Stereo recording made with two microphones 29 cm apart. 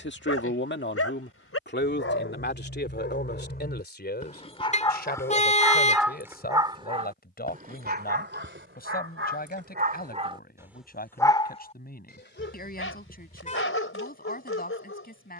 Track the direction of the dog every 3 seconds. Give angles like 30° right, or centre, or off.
50° left, 20° left, 30° right, 20° right, 50° left.